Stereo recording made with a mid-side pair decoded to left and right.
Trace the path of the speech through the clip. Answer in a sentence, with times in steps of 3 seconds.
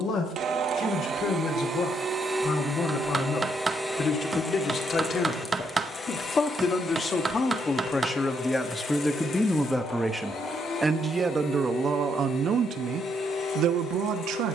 In this clip you hear the speech on the left from 0 s, in the centre from 9 s and on the right from 12 s.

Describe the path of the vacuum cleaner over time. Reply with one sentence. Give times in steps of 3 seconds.
You can hear the vacuum cleaner on the right from 0 s, in the centre from 3 s and on the left from 6 s.